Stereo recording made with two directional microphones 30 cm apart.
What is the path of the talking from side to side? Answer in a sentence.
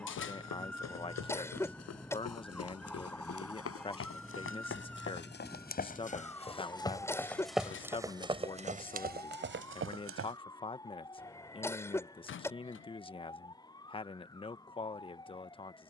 You can hear the talking stay in one place.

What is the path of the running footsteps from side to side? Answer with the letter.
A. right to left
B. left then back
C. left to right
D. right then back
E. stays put
C.